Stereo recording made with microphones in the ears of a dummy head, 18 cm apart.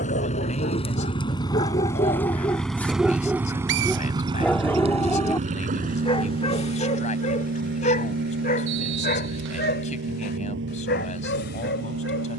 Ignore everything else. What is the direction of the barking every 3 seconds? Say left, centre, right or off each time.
left, centre, left, left.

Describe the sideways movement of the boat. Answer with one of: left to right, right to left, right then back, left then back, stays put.
left to right.